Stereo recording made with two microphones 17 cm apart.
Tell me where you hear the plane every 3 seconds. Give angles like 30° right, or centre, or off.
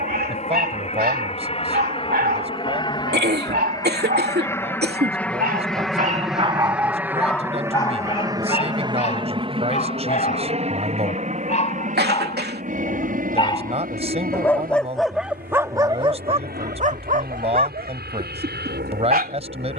40° left, 20° left, 10° right, 40° right, 50° right, 60° right, 60° right.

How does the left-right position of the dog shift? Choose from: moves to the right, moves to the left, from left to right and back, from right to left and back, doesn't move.
from right to left and back.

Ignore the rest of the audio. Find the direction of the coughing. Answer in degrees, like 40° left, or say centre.
80° right.